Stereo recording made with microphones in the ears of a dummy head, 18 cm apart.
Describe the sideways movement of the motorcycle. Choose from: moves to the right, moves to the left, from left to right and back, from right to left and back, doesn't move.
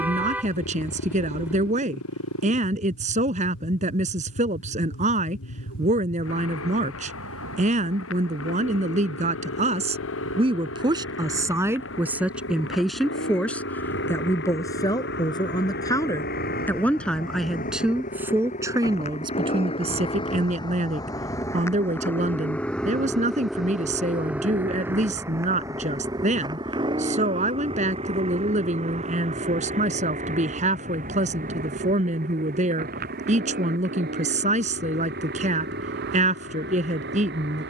moves to the right.